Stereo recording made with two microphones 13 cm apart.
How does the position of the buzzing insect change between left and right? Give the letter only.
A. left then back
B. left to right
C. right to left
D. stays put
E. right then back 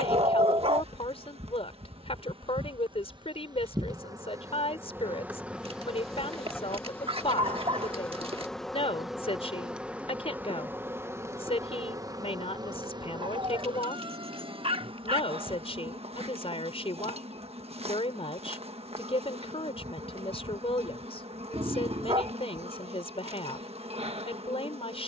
A.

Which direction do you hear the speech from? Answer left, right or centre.
left.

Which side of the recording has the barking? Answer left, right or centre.
right.